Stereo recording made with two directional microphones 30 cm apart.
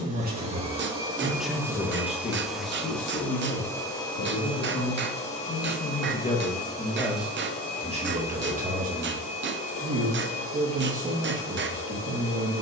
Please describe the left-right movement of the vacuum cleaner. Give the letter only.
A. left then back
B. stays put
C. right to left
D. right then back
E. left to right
C.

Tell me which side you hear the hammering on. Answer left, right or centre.
right.